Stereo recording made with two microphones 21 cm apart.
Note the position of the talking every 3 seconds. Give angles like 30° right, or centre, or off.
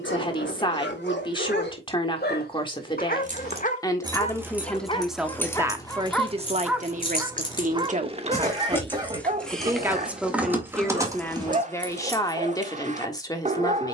20° left, centre, 30° right, centre, 20° left.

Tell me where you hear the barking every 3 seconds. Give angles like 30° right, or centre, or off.
60° left, 30° left, 20° right, 40° right, 40° right.